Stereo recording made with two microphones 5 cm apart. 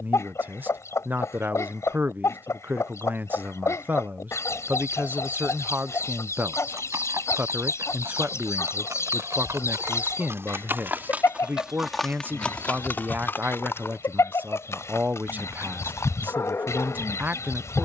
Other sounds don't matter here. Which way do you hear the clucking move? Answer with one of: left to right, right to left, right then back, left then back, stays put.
stays put.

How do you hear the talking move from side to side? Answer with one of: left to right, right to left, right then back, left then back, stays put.
stays put.